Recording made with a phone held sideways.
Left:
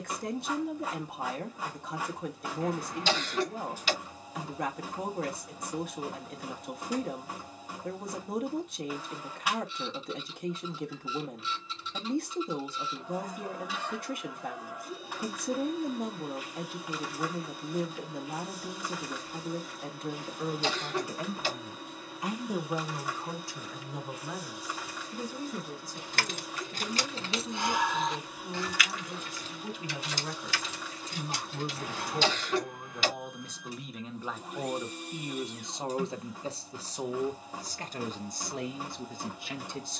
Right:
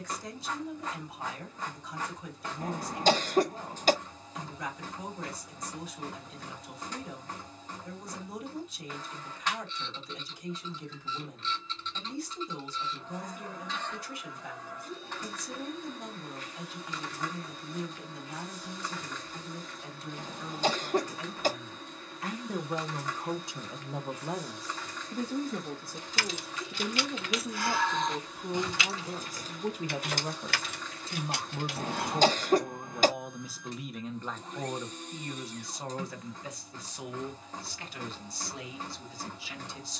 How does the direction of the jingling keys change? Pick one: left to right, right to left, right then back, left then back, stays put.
left to right.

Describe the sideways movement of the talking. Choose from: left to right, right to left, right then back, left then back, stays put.
right then back.